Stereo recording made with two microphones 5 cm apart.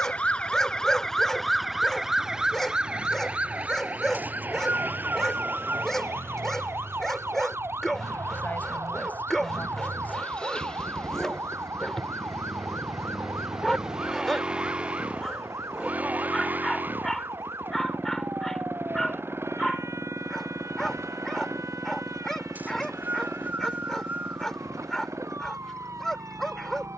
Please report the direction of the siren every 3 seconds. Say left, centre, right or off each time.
centre, right, right, right, right, right, right, right, right.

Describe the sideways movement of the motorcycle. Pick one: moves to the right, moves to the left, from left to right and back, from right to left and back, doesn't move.
moves to the right.